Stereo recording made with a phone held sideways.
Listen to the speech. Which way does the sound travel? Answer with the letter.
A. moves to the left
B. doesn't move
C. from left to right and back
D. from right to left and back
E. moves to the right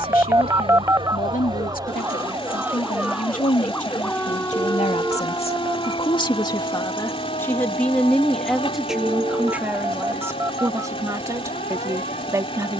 E.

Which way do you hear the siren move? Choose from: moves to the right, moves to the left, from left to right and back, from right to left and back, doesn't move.
moves to the left.